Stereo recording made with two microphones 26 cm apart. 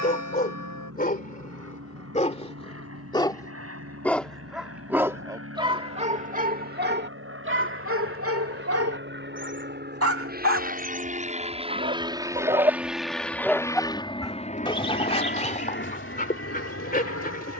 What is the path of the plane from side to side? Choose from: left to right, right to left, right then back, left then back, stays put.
right to left.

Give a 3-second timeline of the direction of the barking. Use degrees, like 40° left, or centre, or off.
30° left, centre, 50° right, 50° right, centre, 30° left.